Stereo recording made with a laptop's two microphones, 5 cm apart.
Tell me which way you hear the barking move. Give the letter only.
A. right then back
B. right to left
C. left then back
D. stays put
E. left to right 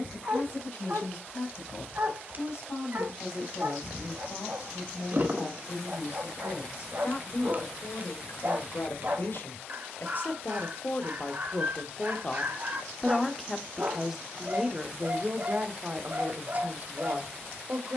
D.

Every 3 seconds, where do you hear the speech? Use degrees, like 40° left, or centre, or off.
70° left, 70° left, 60° left, 40° left, centre, 40° right.